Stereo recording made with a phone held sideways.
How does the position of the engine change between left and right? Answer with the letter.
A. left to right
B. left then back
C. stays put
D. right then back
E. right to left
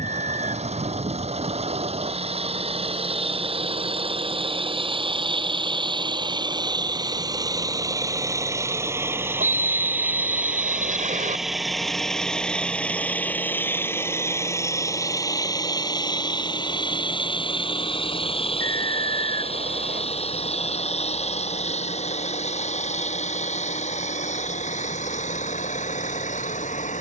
E.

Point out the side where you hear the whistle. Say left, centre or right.
right.